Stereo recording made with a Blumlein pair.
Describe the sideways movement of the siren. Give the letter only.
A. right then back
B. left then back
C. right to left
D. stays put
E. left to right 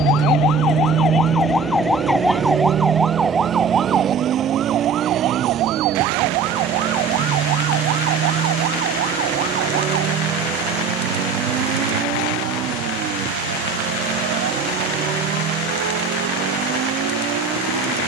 E.